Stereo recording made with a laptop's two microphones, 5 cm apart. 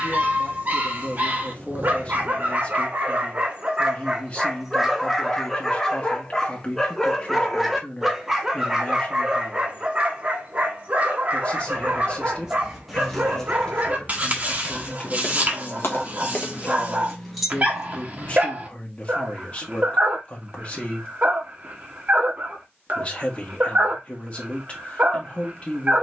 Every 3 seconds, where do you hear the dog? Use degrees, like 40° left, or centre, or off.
40° right, 10° right, centre, 30° right, 40° right, 40° right, 40° right, 40° right, 40° right.